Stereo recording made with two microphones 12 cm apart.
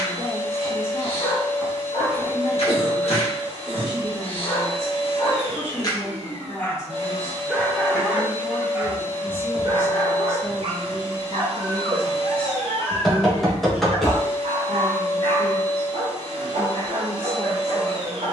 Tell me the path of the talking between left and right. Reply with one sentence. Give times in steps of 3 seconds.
You can hear the talking on the left from 0 s, in the centre from 9 s and on the right from 12 s.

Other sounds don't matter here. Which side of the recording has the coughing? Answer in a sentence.
In this clip you hear the coughing in the centre.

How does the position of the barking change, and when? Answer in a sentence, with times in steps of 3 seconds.
In this clip you hear the barking on the left from 0 s, in the centre from 6 s and on the right from 9 s.